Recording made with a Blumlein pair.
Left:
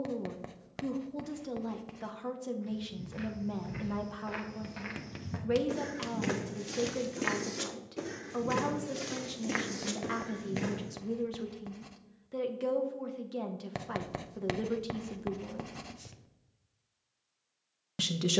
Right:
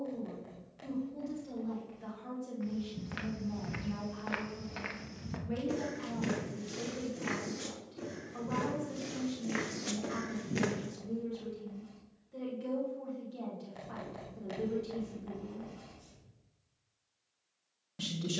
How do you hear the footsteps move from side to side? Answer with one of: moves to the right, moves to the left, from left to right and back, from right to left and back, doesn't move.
from right to left and back.